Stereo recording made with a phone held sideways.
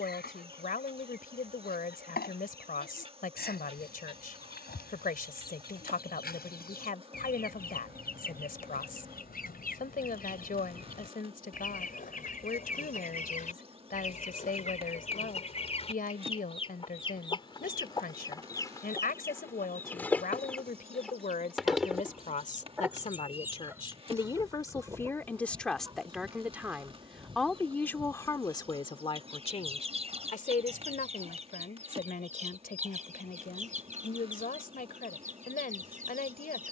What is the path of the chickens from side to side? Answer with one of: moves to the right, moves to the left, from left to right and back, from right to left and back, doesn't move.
moves to the right.